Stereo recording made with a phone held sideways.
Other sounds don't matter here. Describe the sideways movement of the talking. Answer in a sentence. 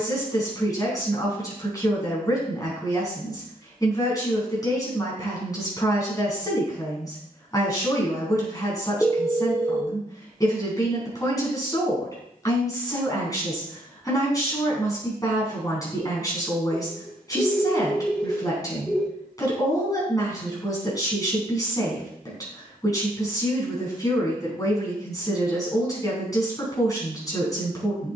In this clip you hear the talking stay in one place.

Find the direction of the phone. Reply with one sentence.
In this clip you hear the phone in the centre.